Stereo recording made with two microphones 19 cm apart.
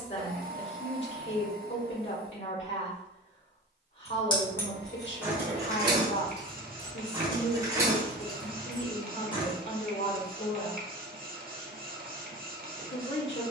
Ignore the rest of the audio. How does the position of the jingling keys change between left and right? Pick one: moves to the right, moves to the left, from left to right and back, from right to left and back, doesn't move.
from left to right and back.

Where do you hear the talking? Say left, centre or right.
left.